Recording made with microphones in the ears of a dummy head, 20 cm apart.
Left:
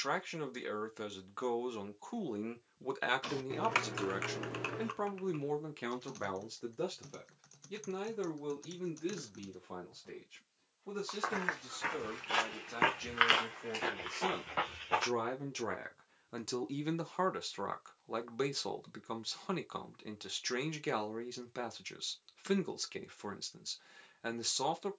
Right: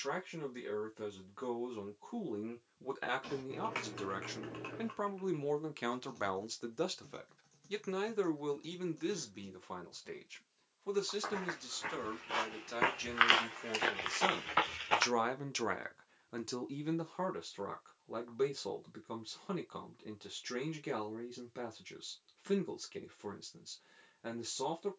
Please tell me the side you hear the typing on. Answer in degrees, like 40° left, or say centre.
50° left.